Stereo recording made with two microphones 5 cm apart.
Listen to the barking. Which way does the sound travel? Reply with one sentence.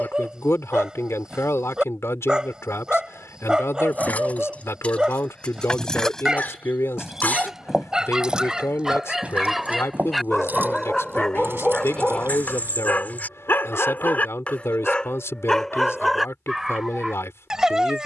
In this clip you hear the barking move from right to left and back again.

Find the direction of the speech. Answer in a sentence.
You can hear the speech on the left.